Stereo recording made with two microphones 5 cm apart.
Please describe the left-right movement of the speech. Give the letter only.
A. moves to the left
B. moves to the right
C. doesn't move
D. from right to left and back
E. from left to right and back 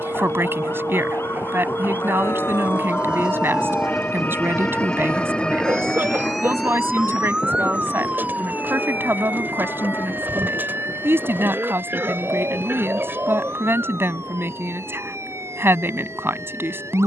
C.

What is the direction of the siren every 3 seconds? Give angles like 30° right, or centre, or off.
60° left, 30° left, 20° right, 50° right, 60° right, 70° right.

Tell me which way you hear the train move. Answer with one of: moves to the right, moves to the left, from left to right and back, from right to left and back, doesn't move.
moves to the left.